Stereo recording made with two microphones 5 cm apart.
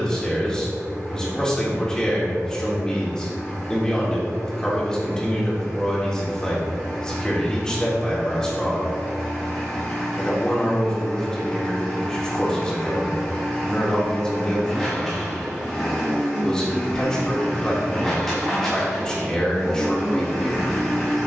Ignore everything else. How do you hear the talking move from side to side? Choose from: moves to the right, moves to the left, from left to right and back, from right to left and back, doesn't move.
doesn't move.